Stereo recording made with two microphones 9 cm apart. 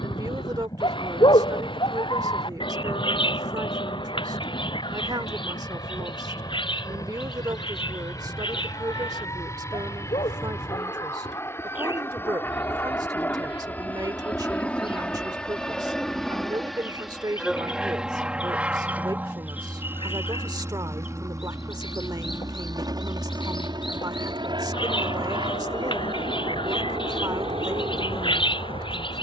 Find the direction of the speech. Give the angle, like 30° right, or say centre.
50° right.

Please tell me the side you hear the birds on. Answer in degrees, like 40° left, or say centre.
70° left.